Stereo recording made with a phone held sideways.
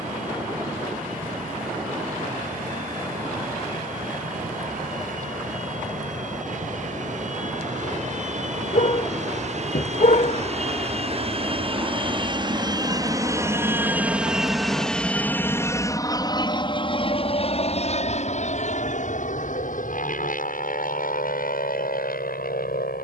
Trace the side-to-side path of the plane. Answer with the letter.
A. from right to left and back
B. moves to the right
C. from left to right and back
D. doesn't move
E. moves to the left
E.